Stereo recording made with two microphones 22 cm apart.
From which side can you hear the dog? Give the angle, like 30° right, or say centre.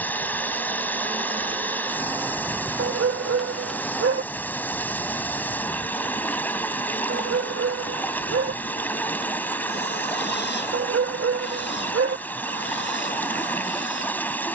80° right.